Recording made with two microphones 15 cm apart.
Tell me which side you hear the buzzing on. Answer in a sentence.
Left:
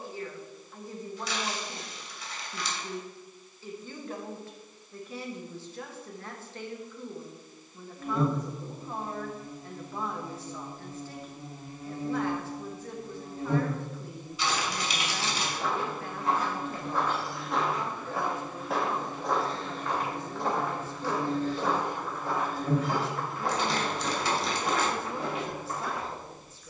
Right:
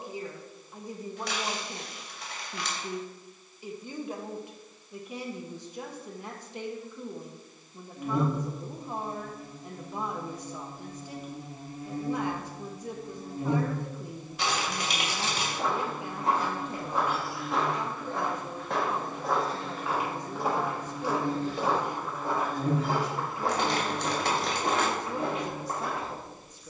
In this clip you hear the buzzing on the right.